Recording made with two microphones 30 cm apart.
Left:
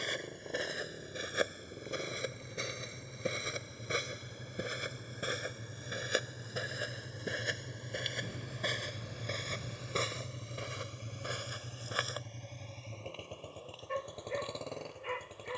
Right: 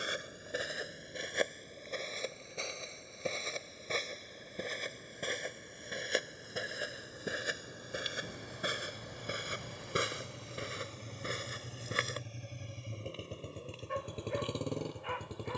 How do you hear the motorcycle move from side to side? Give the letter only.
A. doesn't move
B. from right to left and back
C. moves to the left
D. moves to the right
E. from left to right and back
D.